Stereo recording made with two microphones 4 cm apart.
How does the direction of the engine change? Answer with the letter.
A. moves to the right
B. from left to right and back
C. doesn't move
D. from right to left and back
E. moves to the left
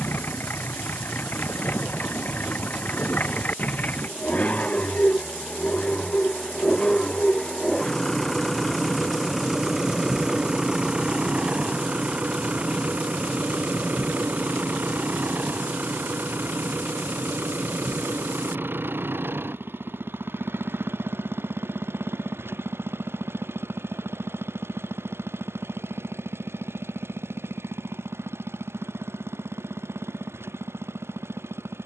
A.